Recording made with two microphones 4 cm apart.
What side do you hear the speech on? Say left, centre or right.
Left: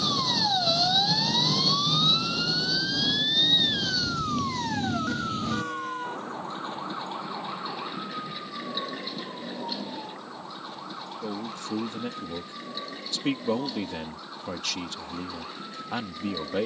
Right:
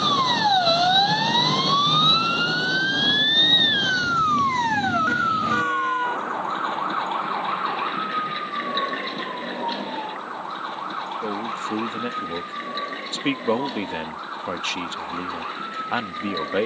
right.